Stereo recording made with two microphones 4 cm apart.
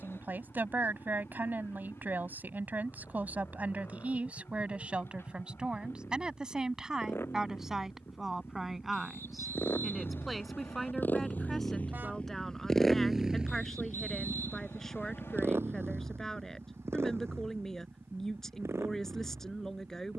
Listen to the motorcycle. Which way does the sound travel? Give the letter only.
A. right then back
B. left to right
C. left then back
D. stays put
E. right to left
B.